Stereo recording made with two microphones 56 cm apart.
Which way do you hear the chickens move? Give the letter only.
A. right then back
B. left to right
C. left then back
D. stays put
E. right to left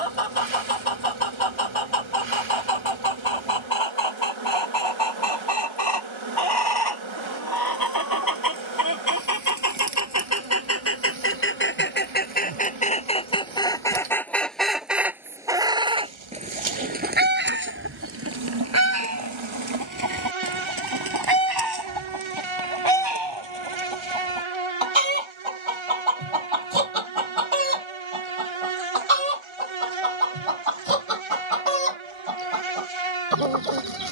B.